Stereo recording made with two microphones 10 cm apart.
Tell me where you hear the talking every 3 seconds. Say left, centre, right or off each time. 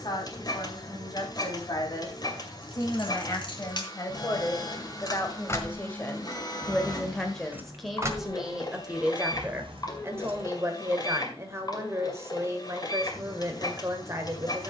left, left, centre, right, right.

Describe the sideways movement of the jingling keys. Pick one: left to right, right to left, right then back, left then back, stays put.
left to right.